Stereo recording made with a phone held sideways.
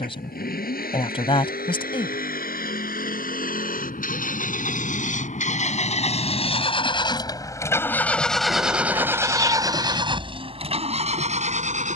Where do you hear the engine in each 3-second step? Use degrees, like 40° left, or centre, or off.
70° left, 60° left, 20° left, 40° right.